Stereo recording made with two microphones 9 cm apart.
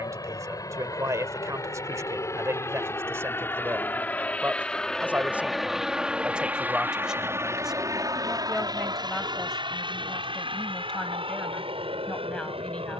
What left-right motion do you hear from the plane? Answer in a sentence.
In this clip you hear the plane move to the right.